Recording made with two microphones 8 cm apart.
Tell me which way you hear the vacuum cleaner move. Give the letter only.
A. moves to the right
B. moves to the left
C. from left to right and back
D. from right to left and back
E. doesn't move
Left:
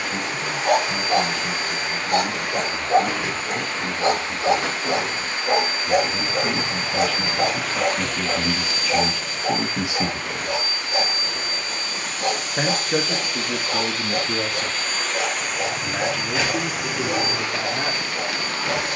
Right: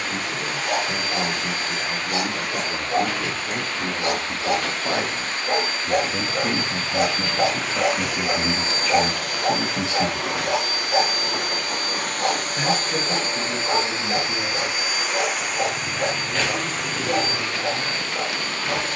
C.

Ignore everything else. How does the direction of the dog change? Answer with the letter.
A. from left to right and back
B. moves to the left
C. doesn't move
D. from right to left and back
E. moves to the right
E.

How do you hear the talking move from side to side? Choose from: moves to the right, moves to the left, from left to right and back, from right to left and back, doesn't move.
moves to the left.